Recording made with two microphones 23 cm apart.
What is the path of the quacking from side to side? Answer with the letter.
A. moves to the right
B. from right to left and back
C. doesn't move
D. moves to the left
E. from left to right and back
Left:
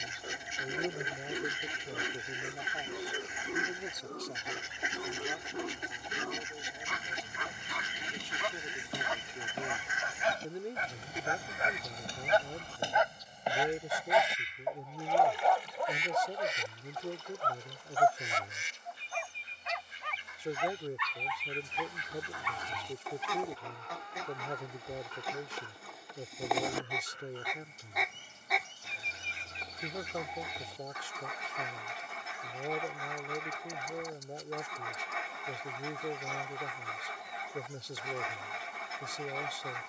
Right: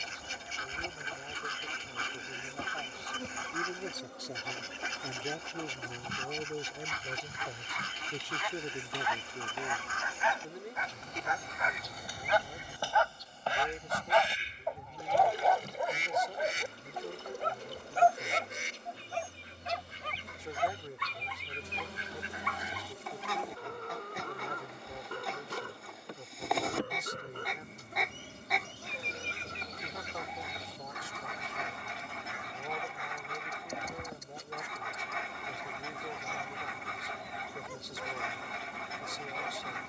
E.